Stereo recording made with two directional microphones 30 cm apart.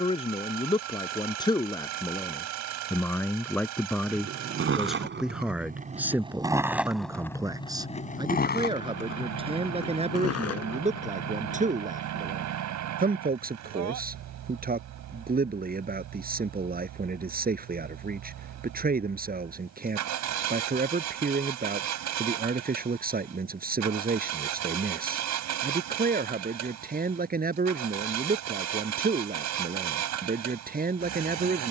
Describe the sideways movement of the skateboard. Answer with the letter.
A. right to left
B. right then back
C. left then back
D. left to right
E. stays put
A.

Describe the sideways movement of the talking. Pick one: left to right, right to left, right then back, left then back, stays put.
left to right.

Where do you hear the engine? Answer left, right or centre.
right.